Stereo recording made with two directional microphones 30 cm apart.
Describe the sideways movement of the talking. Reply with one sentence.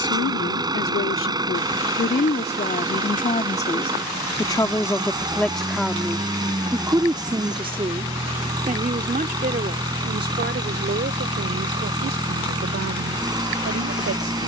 You can hear the talking go from the left side to the right.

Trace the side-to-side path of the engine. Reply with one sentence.
You can hear the engine stay put.